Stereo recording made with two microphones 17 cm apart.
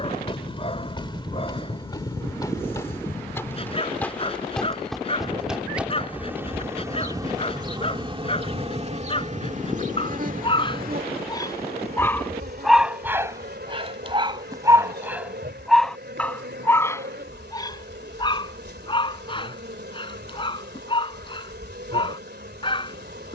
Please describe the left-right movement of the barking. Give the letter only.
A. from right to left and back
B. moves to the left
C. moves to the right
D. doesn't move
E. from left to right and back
E.